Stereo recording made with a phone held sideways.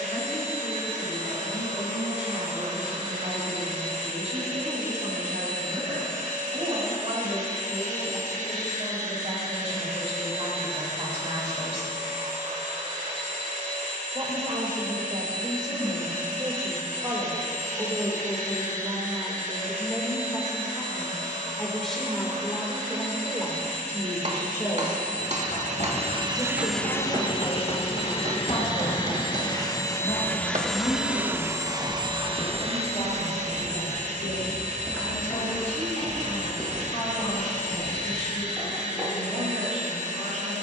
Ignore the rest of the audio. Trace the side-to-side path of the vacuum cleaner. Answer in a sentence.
You can hear the vacuum cleaner move from right to left and back again.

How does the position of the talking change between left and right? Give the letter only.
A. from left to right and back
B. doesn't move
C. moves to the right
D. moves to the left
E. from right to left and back
D.